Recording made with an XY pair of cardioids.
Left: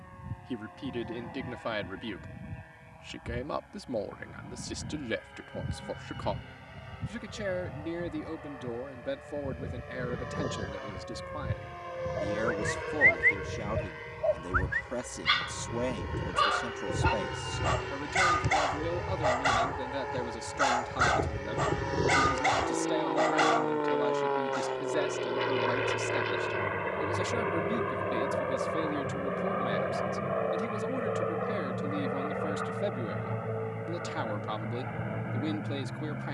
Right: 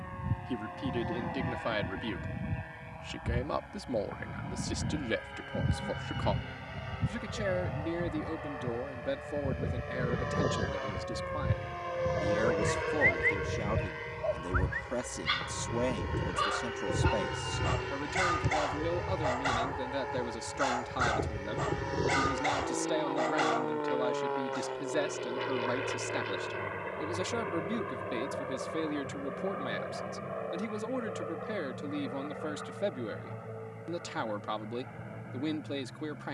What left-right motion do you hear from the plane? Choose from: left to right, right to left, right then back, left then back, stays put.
right to left.